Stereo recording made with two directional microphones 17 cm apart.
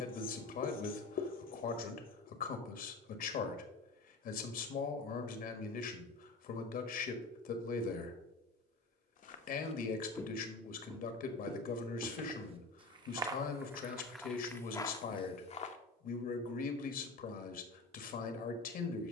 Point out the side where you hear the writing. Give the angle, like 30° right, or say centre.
60° left.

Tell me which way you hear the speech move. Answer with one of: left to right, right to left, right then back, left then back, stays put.
stays put.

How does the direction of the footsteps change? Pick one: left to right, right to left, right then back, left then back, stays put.
right then back.